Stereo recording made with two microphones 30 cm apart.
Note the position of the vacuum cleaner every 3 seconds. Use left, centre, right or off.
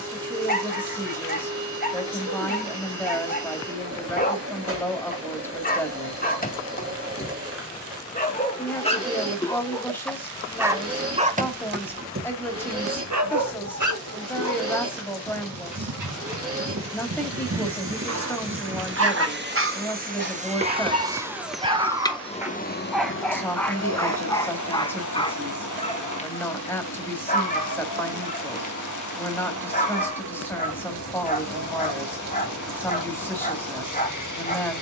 right, right, right, right, right, right, right, left, left, left, left, left.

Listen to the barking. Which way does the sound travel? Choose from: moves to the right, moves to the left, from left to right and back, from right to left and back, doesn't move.
from left to right and back.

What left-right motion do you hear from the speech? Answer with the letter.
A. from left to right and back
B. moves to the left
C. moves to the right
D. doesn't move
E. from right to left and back
D.